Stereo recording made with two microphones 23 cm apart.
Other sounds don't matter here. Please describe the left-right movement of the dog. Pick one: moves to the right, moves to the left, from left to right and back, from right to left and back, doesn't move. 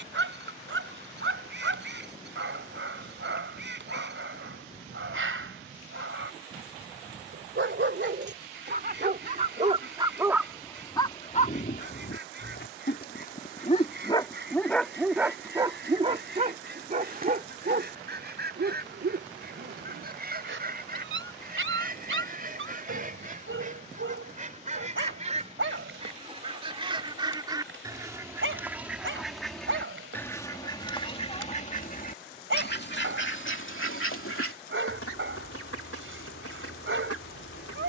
from right to left and back.